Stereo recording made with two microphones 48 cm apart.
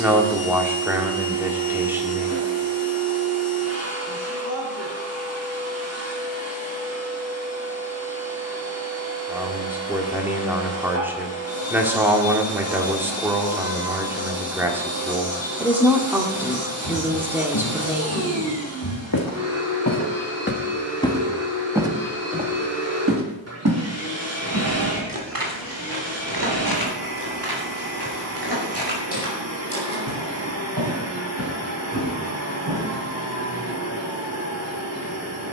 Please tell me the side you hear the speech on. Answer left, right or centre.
centre.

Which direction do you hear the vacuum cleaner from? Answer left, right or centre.
right.